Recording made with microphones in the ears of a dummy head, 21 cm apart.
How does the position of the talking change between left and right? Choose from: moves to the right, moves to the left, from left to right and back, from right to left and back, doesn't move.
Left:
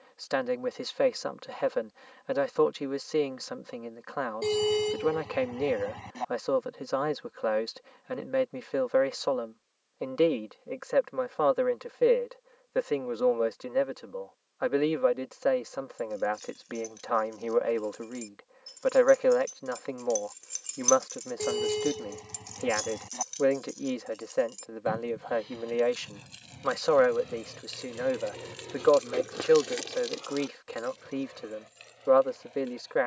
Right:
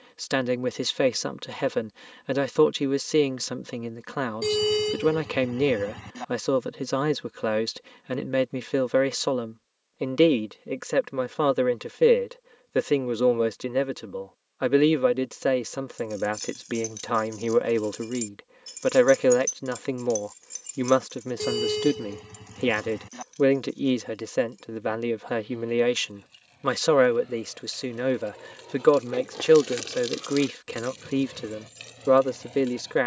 doesn't move.